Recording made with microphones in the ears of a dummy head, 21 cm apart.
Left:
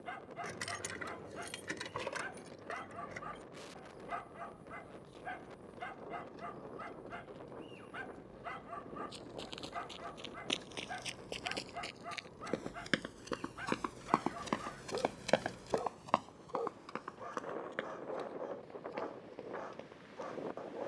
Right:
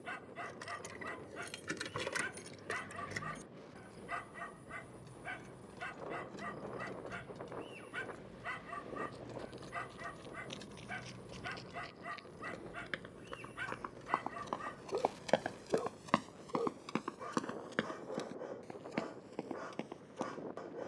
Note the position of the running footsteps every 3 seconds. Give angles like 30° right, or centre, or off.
off, off, off, 80° left, 60° left, 30° right, 70° right.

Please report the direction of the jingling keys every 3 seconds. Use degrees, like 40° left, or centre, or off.
10° right, 60° right, 60° right, 40° right, centre, 20° left, off.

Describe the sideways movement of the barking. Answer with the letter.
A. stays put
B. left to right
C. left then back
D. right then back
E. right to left
A.